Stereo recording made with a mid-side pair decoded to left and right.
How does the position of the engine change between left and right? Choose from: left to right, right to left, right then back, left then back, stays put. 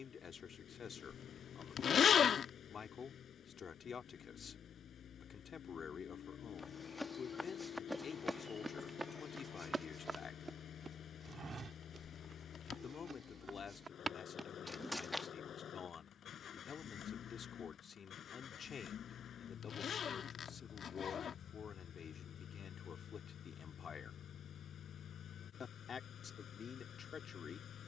stays put.